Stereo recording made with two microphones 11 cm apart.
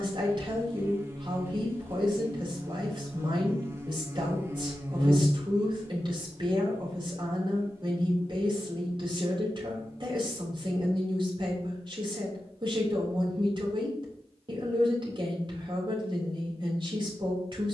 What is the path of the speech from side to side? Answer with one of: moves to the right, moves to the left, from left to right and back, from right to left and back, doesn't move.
doesn't move.